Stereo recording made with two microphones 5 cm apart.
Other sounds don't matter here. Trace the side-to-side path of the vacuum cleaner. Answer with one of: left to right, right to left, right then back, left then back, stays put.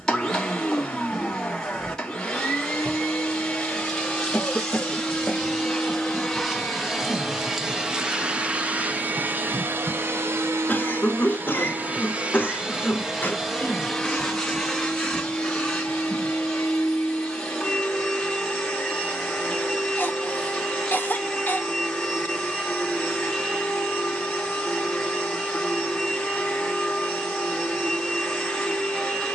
right then back.